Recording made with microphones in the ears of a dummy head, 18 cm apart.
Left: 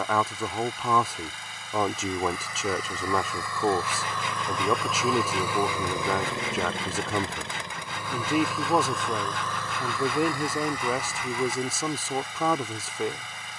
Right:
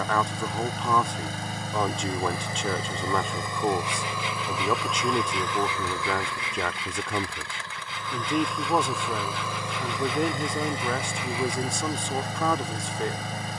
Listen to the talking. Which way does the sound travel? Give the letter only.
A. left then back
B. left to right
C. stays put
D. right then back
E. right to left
C.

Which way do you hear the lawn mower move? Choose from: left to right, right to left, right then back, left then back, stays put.
left then back.